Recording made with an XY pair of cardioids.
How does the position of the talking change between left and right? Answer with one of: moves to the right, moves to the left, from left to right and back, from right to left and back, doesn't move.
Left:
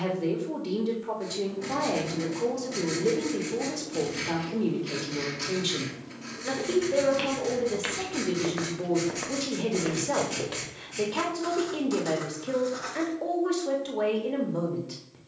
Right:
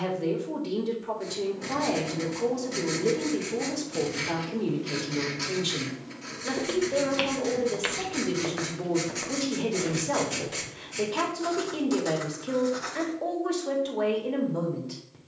doesn't move.